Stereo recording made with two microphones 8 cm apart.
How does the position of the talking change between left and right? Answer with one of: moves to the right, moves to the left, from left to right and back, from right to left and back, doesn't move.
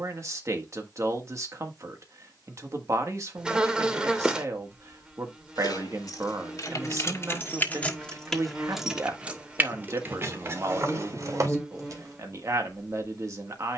doesn't move.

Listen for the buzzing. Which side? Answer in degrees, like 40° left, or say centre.
10° right.